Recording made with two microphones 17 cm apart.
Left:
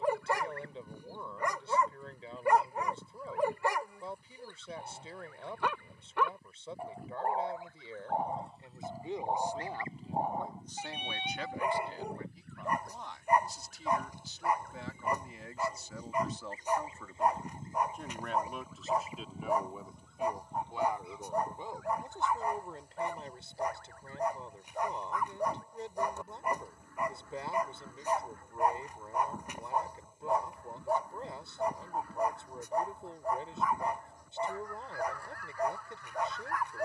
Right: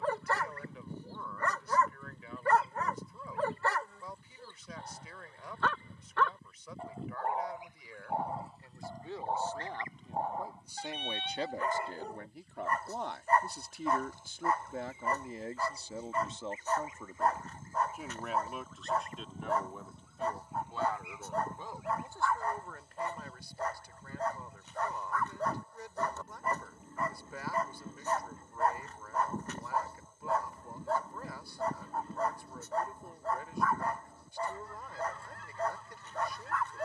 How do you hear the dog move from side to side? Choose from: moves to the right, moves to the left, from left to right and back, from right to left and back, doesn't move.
doesn't move.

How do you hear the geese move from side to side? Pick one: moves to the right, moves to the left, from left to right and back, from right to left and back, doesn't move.
from right to left and back.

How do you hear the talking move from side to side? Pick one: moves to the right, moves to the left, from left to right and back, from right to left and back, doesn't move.
from left to right and back.